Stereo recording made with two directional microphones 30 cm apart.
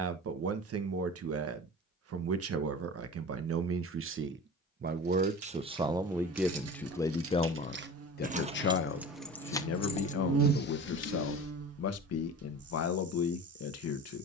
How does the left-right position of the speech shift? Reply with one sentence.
In this clip you hear the speech travel towards the left.